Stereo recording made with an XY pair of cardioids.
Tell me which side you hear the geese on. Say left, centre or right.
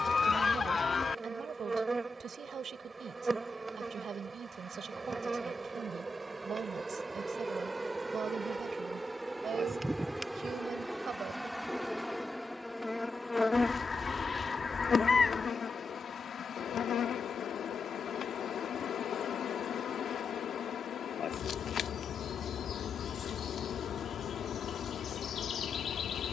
left.